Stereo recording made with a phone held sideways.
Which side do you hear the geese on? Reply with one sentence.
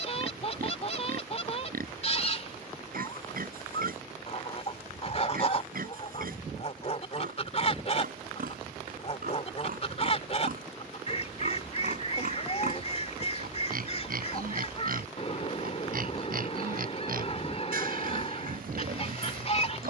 In this clip you hear the geese on the left.